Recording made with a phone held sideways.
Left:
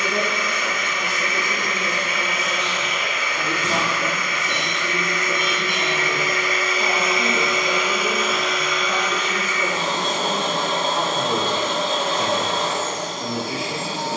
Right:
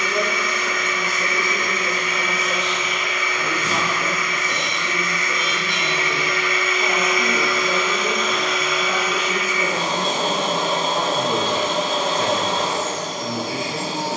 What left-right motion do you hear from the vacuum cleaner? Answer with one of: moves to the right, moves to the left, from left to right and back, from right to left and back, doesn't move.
moves to the right.